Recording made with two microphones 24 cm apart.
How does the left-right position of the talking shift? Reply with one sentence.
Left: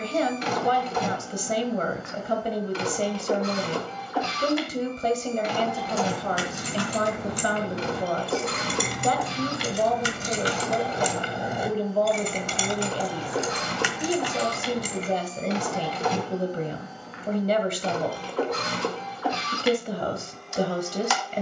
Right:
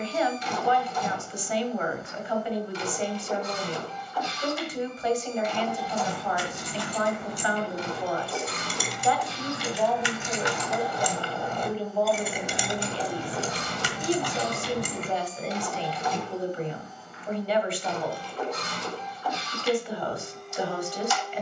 You can hear the talking stay in one place.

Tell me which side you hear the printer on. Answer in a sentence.
In this clip you hear the printer on the left.